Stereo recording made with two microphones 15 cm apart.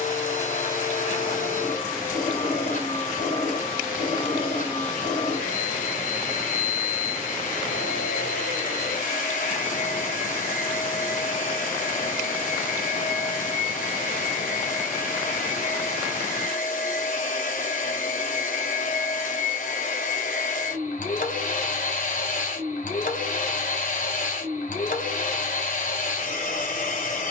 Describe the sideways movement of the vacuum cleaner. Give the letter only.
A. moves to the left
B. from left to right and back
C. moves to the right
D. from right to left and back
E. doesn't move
E.